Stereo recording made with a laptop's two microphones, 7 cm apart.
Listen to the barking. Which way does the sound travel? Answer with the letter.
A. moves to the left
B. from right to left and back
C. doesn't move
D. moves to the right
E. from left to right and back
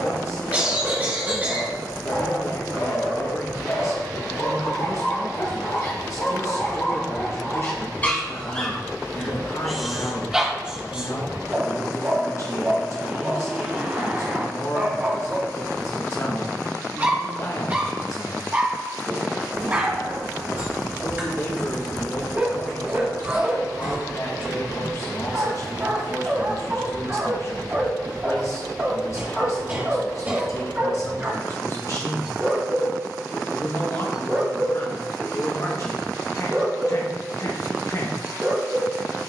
D.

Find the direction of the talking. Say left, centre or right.
left.